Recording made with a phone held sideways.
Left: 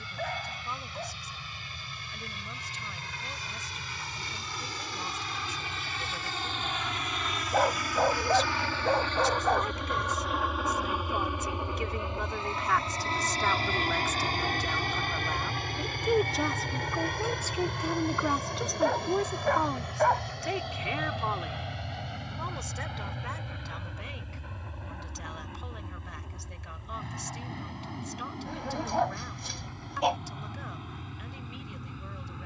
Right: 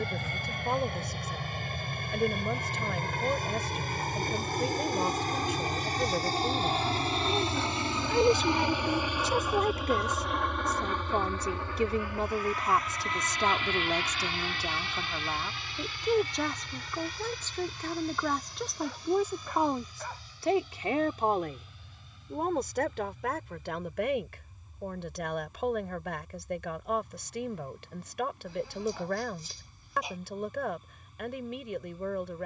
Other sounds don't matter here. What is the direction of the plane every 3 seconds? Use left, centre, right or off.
right, right, right, centre, left, left, left, left, left, left, left.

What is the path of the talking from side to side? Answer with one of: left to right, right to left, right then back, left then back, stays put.
left then back.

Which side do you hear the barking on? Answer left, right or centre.
left.